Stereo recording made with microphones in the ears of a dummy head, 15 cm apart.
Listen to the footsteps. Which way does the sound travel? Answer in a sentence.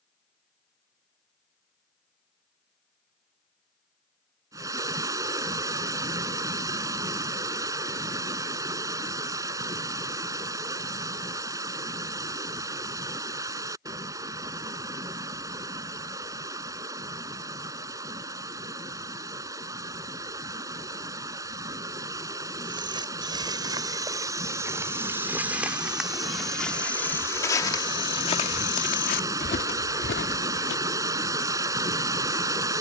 You can hear the footsteps travel towards the left.